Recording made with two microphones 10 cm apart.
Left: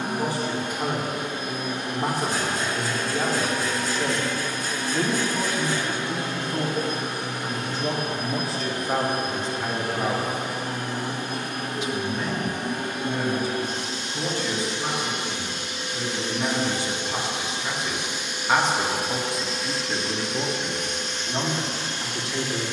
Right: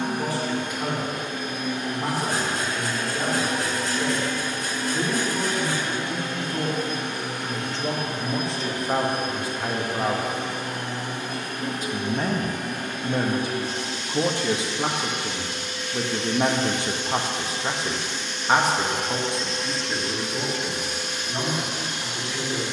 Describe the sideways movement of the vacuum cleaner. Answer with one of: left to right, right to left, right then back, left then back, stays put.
left to right.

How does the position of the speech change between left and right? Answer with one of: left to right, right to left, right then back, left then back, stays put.
right then back.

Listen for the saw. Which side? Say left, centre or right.
right.